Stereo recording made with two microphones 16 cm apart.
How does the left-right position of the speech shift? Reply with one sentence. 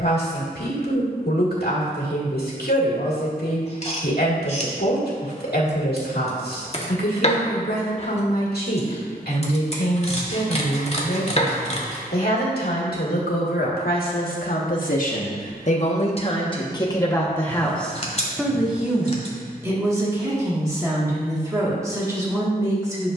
In this clip you hear the speech travel towards the right.